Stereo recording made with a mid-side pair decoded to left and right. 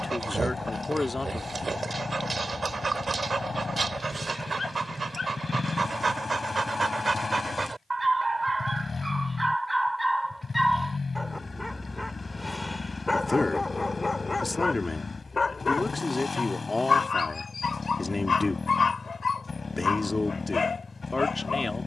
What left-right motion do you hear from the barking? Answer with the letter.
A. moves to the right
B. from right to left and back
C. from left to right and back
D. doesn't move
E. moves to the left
E.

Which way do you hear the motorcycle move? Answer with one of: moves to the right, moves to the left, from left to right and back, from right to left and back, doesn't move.
doesn't move.